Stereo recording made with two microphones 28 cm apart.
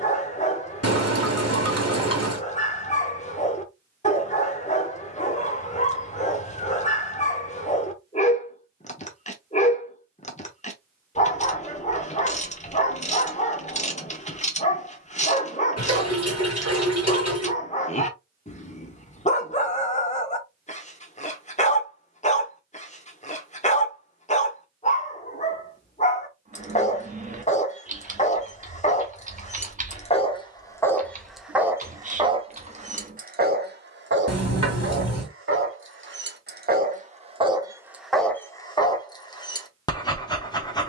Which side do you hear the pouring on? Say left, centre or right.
left.